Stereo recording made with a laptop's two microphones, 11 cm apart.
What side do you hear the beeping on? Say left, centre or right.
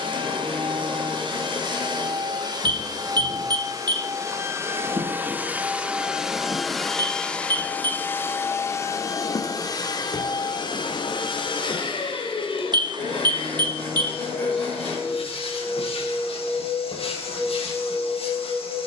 right.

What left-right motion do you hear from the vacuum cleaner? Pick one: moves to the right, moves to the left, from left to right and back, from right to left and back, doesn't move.
moves to the left.